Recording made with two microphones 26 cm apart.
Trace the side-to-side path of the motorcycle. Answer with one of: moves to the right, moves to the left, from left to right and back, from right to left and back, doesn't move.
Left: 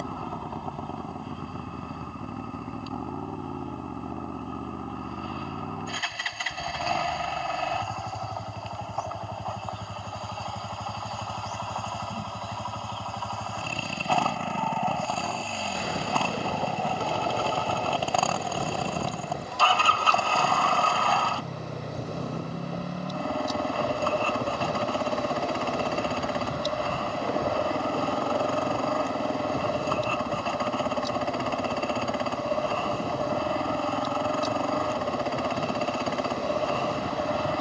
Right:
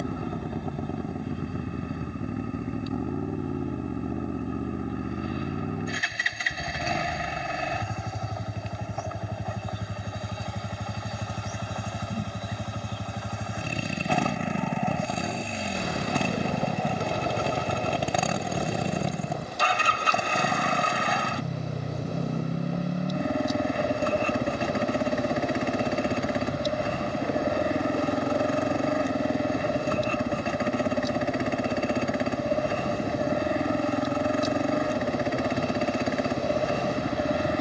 doesn't move.